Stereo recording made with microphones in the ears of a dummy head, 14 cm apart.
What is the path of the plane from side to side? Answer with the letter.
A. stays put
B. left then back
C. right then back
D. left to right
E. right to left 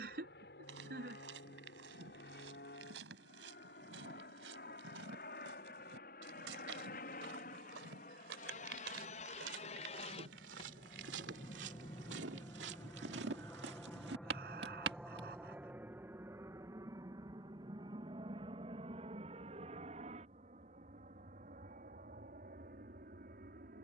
D.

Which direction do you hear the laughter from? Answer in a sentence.
In this clip you hear the laughter on the right.